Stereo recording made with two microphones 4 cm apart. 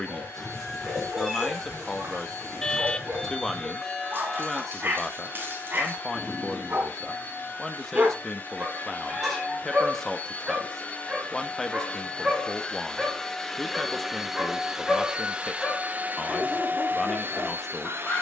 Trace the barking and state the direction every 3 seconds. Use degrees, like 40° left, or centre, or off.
40° right, 40° right, 40° right, 20° right, centre, 20° left.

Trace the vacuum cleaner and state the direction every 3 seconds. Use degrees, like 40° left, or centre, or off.
60° left, 50° left, 50° left, 30° left, 10° left, 40° right.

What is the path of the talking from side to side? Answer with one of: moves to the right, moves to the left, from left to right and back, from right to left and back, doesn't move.
doesn't move.